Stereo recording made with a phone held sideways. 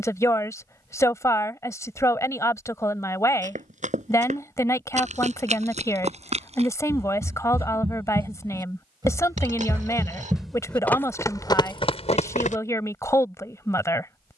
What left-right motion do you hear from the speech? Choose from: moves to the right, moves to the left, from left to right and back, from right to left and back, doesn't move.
doesn't move.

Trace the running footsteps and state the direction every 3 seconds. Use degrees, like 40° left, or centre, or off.
off, 50° right, 40° right, centre, 50° left.